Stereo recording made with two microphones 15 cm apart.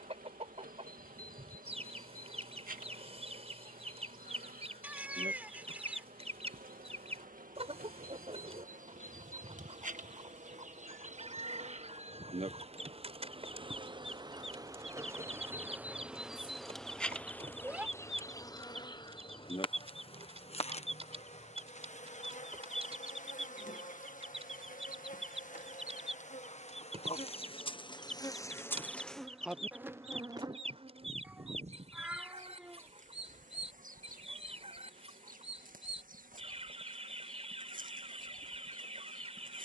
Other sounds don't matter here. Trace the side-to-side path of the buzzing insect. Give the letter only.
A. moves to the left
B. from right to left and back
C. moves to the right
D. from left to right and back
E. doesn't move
B.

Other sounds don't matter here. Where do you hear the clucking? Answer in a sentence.
You can hear the clucking on the right.